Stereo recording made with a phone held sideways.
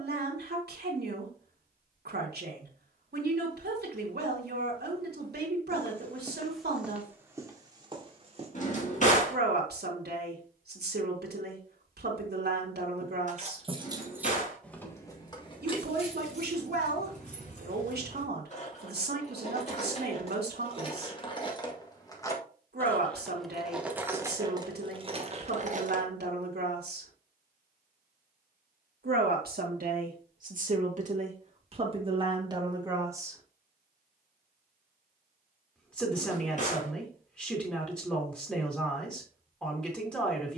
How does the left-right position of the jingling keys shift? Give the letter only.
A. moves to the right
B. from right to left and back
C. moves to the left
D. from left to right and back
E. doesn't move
B.